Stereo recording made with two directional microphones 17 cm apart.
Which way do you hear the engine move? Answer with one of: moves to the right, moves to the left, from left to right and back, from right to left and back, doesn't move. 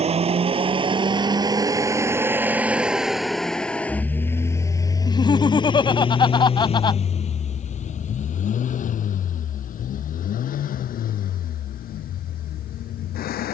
moves to the left.